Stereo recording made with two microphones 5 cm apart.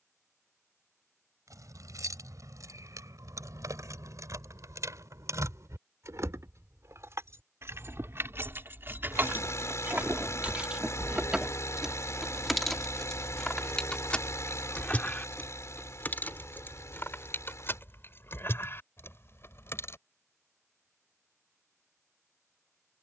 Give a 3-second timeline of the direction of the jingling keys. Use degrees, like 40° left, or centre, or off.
80° right, 70° right, 60° right, 30° right, 10° left, 30° left, 40° left, off.